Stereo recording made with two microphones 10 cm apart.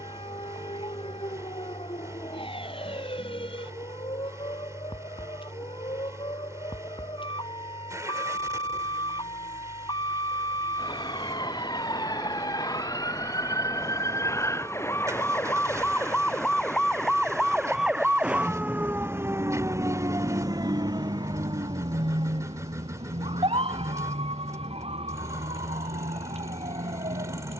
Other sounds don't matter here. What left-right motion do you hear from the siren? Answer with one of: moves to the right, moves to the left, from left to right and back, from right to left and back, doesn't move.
moves to the right.